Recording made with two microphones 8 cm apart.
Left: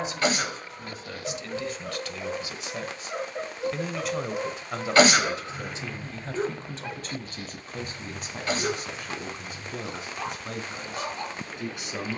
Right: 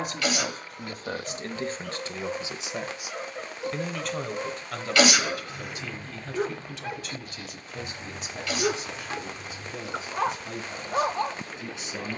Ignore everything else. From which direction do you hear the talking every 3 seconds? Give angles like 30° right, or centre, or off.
40° right, 10° left, 40° left, 50° left.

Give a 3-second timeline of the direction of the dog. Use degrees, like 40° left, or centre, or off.
30° left, 20° left, 10° right, 50° right.